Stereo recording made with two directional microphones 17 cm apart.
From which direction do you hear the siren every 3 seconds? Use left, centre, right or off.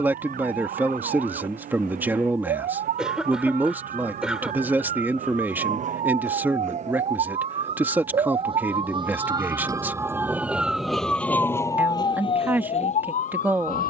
right, right, right, centre, left.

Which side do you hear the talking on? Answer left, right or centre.
centre.